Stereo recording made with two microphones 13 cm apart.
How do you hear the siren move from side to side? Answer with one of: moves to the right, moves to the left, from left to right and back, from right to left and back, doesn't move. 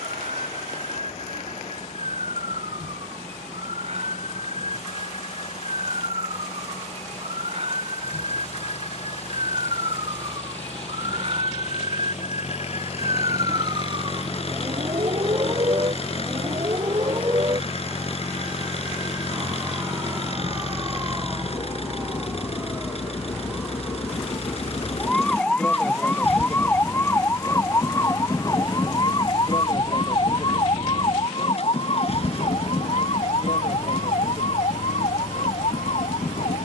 moves to the left.